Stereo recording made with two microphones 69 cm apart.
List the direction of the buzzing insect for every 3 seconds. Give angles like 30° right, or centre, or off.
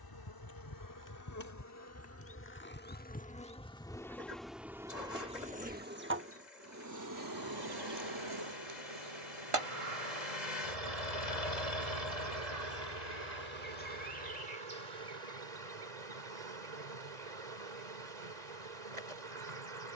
20° left, centre, 30° right, 50° right, 70° right, 70° right, 70° right.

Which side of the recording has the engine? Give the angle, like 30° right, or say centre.
80° left.